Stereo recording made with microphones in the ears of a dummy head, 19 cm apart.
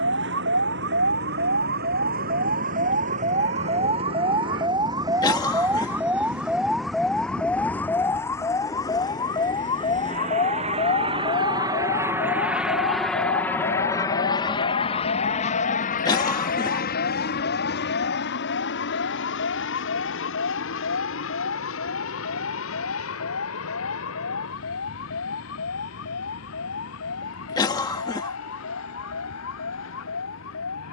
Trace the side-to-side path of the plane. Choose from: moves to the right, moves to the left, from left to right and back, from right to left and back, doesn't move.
moves to the left.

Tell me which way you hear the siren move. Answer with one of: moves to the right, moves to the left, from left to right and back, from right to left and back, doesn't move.
moves to the left.